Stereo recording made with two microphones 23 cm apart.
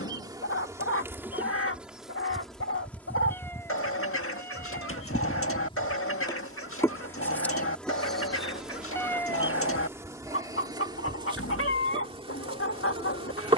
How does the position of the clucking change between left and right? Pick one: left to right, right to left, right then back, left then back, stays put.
stays put.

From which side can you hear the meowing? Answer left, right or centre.
centre.